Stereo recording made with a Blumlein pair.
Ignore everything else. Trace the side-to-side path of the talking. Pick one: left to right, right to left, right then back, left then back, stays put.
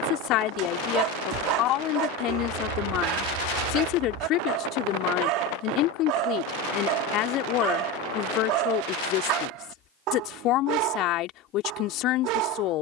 stays put.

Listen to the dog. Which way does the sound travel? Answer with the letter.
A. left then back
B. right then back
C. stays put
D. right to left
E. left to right
C.